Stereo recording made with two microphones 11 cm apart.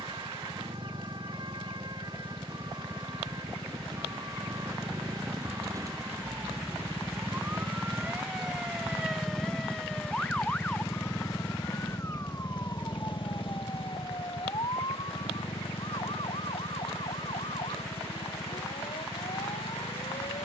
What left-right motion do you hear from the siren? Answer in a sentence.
You can hear the siren move to the left.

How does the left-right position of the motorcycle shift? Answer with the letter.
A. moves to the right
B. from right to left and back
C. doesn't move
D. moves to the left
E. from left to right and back
D.